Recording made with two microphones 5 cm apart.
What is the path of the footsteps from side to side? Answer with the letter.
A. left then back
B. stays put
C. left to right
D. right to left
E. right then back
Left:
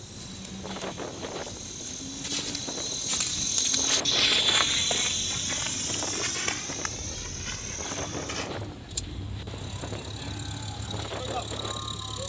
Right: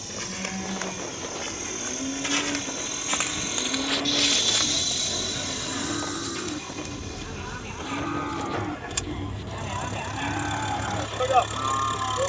D.